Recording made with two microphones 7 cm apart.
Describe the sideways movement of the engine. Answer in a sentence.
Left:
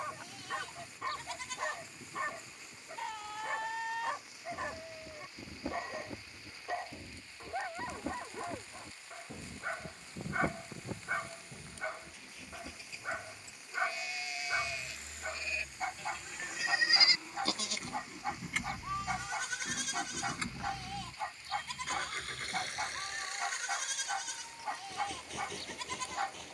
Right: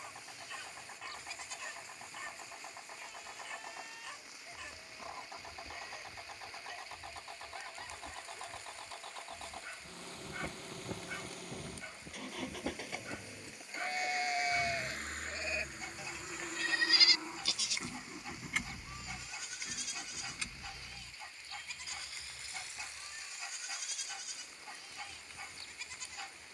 You can hear the engine move from right to left.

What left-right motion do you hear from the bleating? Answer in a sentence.
In this clip you hear the bleating go right and come back.